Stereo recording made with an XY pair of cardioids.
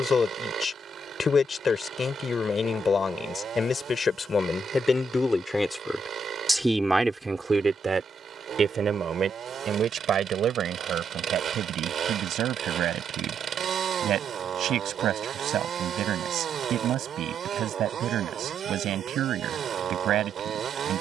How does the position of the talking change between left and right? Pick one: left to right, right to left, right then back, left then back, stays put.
left to right.